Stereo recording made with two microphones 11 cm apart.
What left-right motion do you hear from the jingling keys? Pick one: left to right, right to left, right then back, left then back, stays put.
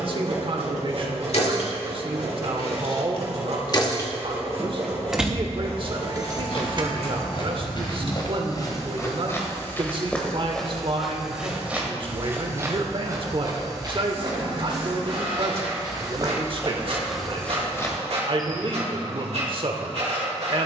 left to right.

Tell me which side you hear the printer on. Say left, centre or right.
right.